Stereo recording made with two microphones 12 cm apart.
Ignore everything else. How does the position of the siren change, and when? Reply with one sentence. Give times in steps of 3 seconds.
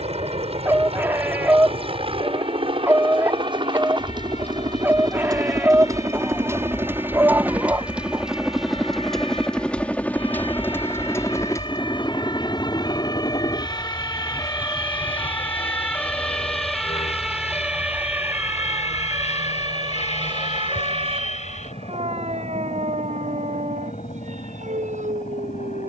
You can hear the siren on the left from 0 s, in the centre from 15 s and on the right from 18 s.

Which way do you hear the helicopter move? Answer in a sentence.
In this clip you hear the helicopter move to the left.